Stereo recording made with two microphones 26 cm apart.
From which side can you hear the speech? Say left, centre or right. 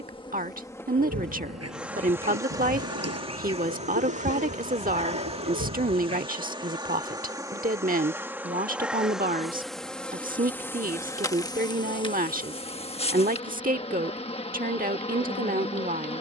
right.